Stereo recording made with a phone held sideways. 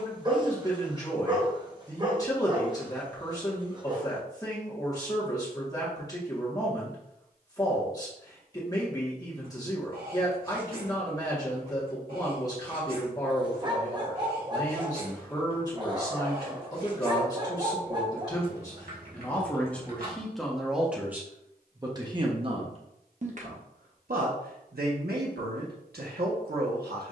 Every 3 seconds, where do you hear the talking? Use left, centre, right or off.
left, left, left, left, left, left, centre, right, right.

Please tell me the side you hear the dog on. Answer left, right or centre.
right.